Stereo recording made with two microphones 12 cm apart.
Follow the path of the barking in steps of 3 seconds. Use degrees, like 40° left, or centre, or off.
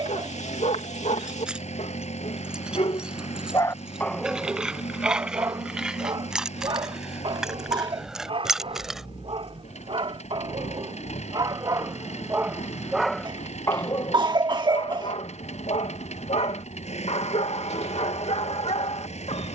70° left, 10° right, 40° right, 40° right, 20° left, 60° left, 60° left.